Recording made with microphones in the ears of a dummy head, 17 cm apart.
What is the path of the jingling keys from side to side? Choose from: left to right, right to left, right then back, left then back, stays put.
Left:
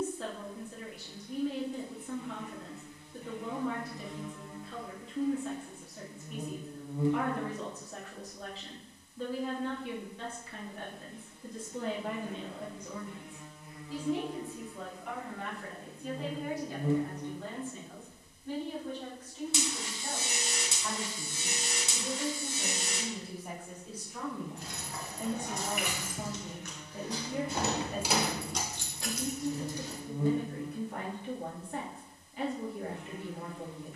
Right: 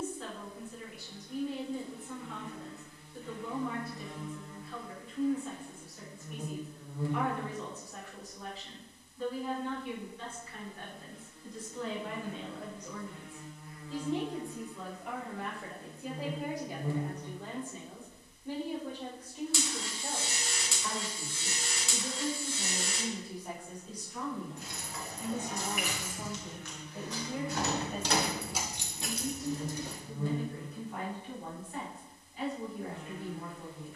left to right.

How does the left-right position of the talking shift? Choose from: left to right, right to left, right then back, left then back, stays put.
right then back.